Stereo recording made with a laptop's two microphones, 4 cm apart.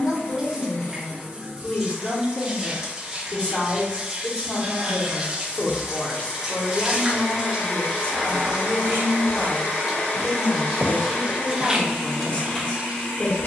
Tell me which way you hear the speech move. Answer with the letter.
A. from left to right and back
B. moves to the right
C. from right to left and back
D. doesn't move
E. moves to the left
D.